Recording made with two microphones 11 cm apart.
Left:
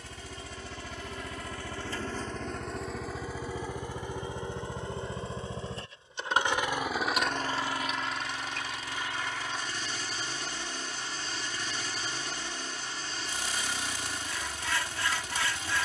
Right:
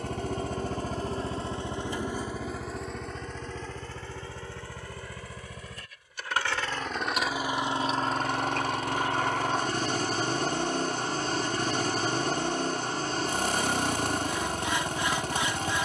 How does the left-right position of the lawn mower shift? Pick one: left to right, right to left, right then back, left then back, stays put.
left then back.